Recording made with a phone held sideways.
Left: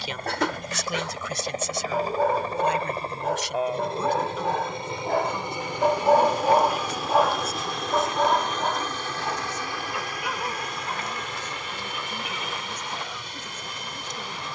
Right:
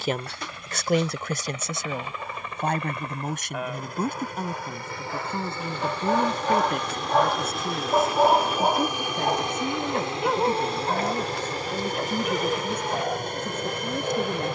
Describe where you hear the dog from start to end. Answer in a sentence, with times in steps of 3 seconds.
In this clip you hear the dog on the left from 0 s, in the centre from 6 s and on the right from 9 s.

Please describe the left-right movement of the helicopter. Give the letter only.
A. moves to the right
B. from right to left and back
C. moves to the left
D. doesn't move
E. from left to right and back
A.